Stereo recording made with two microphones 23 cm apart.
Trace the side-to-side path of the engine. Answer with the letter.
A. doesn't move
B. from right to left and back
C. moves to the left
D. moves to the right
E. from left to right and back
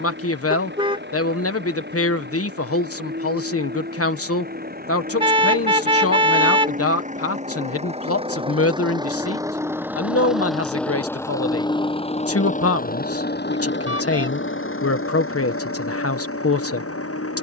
C.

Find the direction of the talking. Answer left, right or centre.
left.